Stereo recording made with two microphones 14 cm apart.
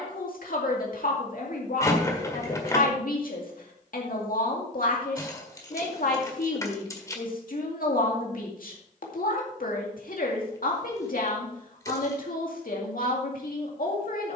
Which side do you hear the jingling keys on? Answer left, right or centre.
left.